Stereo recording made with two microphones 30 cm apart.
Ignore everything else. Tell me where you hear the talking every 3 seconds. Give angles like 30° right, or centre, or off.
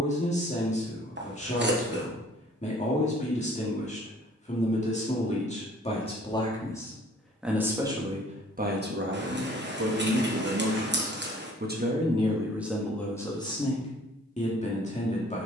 20° left, 20° left, 10° right, 50° right, 10° left.